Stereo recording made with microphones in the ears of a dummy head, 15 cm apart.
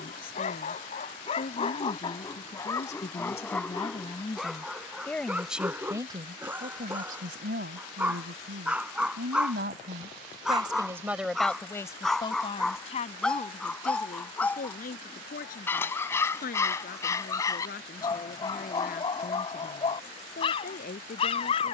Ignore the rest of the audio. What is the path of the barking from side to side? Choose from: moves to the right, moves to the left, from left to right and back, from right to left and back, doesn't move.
from left to right and back.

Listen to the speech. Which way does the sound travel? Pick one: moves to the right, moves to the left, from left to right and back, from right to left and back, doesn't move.
from left to right and back.